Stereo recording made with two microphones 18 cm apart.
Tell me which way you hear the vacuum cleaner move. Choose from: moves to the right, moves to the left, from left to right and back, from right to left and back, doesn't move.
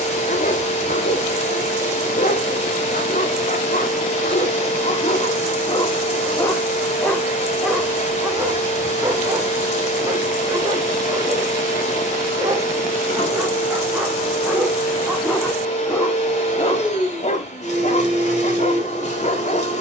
doesn't move.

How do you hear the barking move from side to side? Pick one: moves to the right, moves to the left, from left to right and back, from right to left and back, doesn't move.
from left to right and back.